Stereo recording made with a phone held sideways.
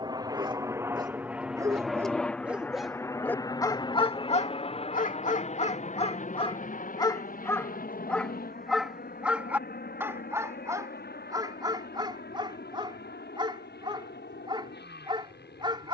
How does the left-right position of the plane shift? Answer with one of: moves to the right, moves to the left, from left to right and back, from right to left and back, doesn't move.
moves to the left.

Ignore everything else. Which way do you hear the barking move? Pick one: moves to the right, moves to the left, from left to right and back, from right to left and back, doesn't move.
from right to left and back.